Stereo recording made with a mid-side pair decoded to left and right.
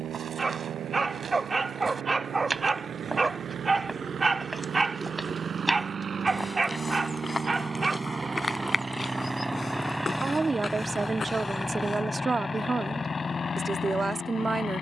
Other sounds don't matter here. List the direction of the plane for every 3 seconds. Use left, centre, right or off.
right, right, right, centre, left.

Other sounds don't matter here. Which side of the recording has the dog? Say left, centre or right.
right.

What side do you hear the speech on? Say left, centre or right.
right.